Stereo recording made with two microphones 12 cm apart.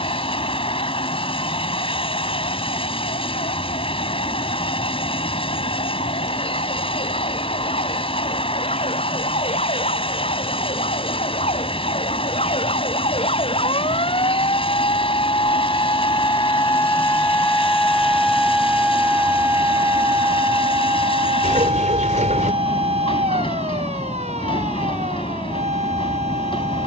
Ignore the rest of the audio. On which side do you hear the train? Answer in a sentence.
You can hear the train on the left.